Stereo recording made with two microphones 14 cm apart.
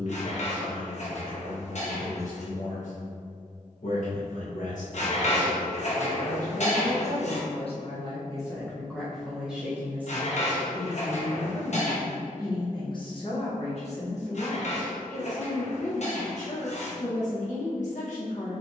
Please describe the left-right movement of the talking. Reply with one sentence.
You can hear the talking go right and come back.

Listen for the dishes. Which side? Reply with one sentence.
You can hear the dishes on the left.